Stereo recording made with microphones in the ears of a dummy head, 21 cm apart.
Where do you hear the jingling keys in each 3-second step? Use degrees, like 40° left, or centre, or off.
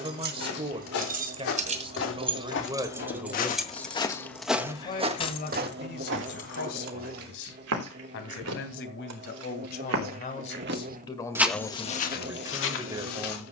30° right, 10° left, 40° left, off, off.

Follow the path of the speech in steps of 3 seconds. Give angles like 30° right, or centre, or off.
20° right, 20° left, 60° left, 30° left, 20° right.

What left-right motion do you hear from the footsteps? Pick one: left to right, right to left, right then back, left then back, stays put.
right then back.